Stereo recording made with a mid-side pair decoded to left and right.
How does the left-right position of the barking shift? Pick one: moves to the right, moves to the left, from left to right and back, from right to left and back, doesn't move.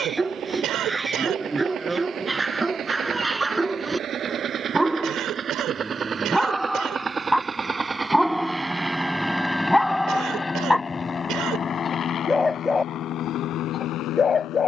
moves to the left.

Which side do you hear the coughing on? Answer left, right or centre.
right.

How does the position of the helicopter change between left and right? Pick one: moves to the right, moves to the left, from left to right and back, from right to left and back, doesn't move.
moves to the left.